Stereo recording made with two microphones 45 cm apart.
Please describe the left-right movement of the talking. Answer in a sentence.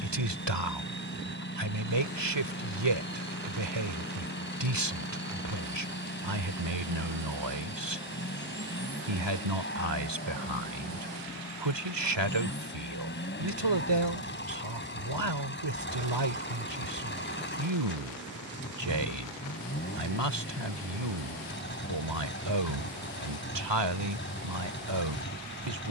In this clip you hear the talking stay in one place.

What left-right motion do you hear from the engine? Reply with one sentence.
You can hear the engine stay put.